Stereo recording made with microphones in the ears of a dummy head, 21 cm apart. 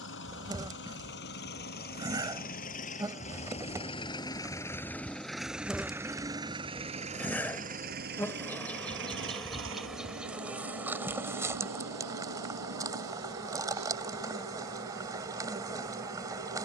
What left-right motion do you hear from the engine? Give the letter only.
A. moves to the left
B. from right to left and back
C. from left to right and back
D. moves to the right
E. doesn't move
D.